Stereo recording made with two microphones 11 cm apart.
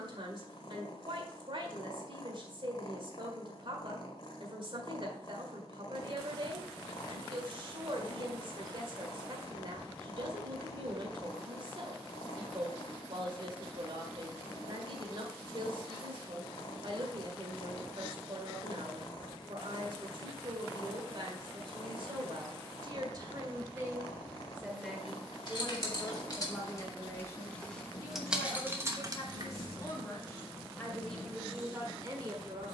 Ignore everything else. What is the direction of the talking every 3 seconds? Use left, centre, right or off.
right, right, right, right, right, right, right, right, centre, left, centre.